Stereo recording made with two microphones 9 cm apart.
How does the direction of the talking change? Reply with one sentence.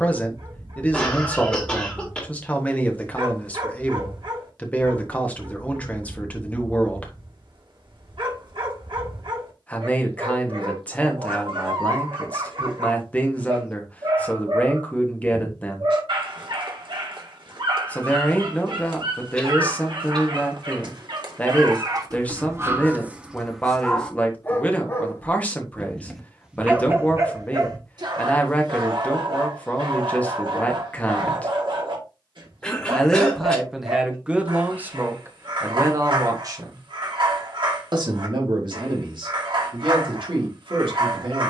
In this clip you hear the talking move to the right.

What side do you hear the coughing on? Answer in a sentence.
You can hear the coughing in the centre.